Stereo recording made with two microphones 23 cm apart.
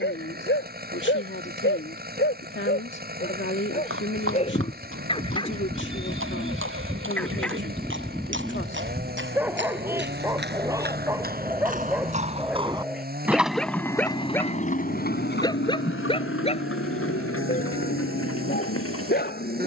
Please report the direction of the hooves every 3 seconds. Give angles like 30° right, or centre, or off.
off, 70° right, 60° right, 50° right, centre, 60° left, 80° left.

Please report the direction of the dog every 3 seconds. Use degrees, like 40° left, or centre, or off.
50° left, 30° left, centre, 10° right, centre, 30° left, 40° left.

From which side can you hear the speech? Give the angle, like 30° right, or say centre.
60° left.